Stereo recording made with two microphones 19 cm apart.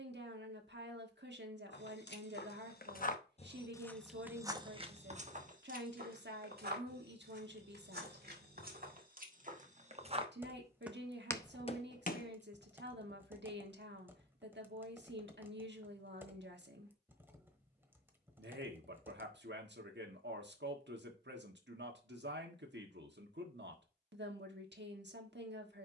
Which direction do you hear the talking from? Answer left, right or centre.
right.